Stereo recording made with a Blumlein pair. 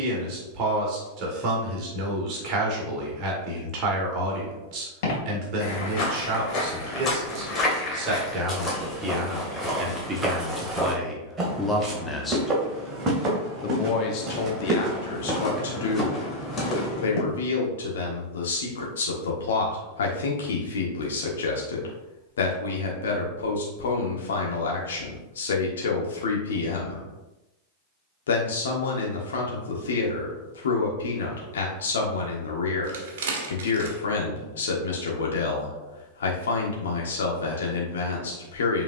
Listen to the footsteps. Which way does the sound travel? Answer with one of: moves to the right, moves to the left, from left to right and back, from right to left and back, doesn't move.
from left to right and back.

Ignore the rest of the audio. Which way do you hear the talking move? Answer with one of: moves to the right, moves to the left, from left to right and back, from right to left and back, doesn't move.
moves to the left.